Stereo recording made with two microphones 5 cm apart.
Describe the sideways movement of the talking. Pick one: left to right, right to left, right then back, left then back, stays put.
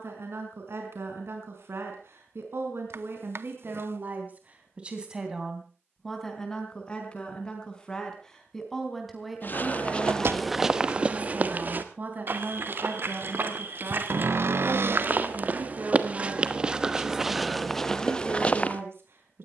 left then back.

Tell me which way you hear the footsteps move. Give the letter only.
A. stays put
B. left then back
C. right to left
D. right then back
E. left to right
D.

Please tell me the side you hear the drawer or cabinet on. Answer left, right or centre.
right.